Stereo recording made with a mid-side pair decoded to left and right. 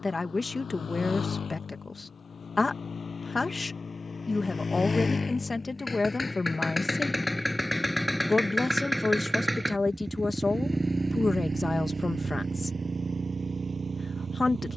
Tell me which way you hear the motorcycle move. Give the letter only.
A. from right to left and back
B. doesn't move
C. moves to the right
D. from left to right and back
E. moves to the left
C.